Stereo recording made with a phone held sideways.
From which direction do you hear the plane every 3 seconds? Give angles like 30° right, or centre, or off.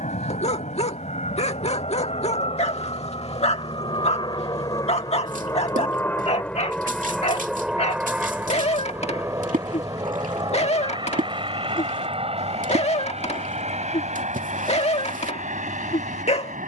50° left, 30° left, centre, 30° right, 40° right, 50° right.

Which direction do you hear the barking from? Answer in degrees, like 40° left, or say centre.
40° left.